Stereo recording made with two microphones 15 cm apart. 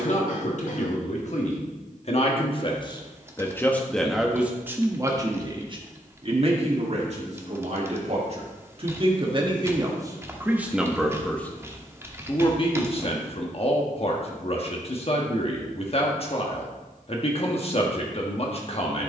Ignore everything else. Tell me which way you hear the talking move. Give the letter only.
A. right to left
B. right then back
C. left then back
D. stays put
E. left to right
B.